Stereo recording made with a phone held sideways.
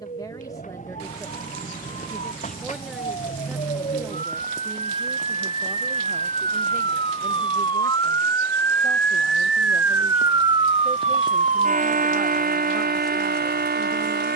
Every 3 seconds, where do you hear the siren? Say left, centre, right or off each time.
left, left, left, right, right.